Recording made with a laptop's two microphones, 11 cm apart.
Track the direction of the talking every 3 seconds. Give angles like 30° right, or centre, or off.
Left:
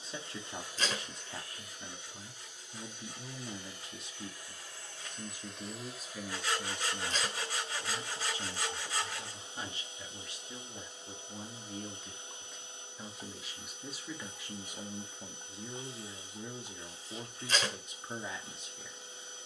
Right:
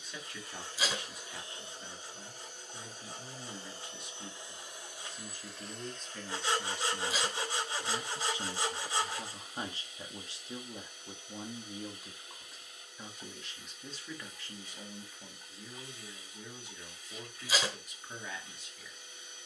30° left, 20° left, 10° right, 30° right, 10° left, 30° left, 30° left.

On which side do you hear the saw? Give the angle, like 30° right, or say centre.
30° right.